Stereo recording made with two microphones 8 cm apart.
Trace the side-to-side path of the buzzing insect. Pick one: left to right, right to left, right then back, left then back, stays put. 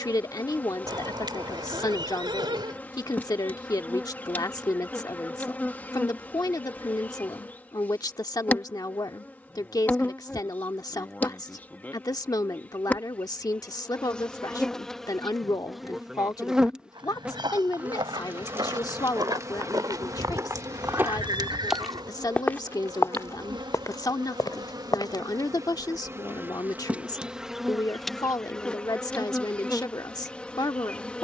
right then back.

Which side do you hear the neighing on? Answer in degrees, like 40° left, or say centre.
70° right.